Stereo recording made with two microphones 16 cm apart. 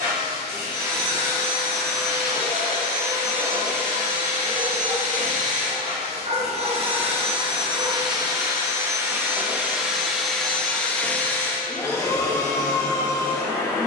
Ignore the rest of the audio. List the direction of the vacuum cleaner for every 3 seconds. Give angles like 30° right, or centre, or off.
60° right, 50° right, 30° right, centre, 20° left.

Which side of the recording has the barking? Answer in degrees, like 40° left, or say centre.
50° right.